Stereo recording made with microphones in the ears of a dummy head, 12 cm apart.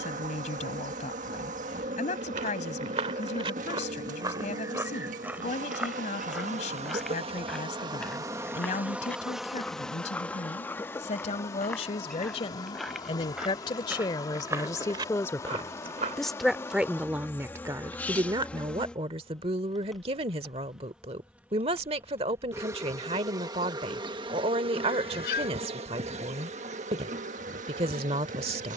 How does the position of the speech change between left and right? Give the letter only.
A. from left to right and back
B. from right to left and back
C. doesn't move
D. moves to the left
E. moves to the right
E.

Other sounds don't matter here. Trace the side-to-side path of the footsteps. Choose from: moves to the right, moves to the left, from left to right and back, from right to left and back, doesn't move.
from right to left and back.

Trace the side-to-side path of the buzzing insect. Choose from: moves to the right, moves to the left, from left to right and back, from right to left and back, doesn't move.
from right to left and back.